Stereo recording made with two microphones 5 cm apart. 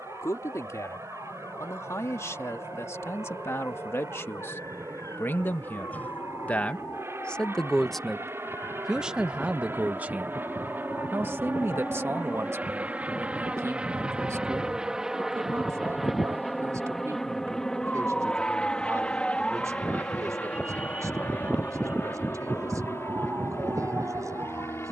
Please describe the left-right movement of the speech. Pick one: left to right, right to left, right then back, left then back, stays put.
left to right.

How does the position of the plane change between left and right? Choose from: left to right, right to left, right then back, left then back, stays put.
right to left.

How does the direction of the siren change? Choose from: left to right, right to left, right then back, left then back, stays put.
left to right.